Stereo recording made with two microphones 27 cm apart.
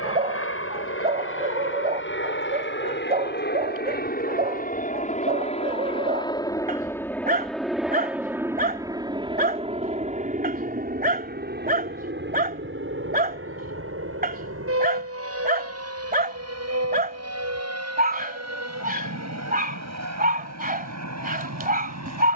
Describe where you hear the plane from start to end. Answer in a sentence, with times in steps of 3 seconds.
You can hear the plane on the left from 0 s, in the centre from 6 s and on the right from 9 s.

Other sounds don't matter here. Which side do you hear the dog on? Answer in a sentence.
You can hear the dog on the right.